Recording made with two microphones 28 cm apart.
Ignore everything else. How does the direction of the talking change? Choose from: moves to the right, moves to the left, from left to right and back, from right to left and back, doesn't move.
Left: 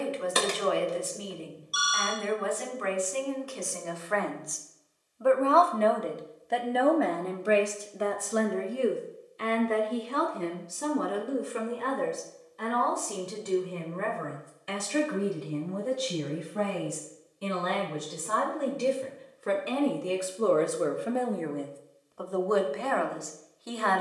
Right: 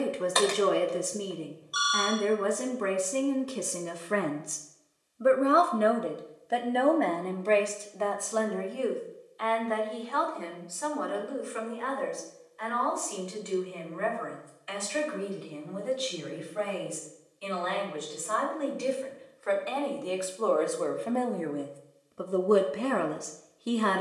from right to left and back.